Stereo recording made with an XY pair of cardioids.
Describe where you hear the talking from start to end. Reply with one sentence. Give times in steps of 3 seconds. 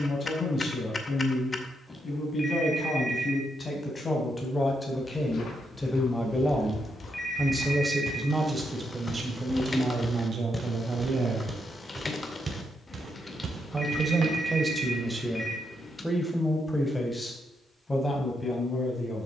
You can hear the talking on the left from 0 s, in the centre from 6 s, on the right from 9 s, in the centre from 15 s and on the left from 18 s.